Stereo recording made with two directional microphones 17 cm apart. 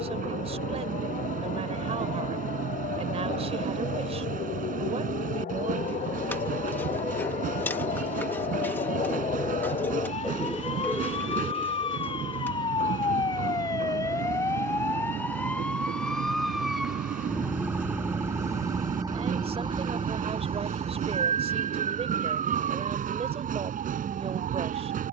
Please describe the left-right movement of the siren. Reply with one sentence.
You can hear the siren travel towards the right.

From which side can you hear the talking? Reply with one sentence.
You can hear the talking on the right.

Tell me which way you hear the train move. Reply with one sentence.
You can hear the train stay in one place.